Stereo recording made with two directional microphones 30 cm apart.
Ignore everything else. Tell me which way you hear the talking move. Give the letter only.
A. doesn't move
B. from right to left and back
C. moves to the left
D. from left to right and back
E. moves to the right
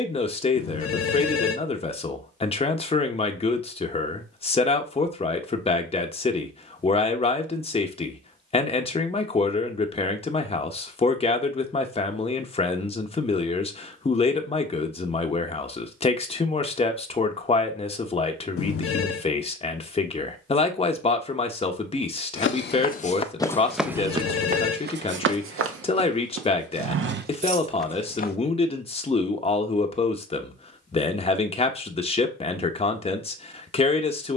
A.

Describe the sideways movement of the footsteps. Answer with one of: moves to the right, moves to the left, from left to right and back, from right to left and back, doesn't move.
from left to right and back.